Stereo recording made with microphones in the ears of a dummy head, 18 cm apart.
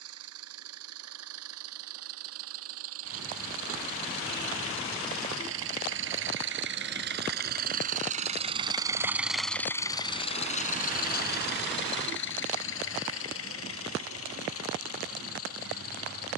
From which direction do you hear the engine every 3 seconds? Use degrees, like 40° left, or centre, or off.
80° right, 70° right, 40° right, 30° left, 70° left, 70° left.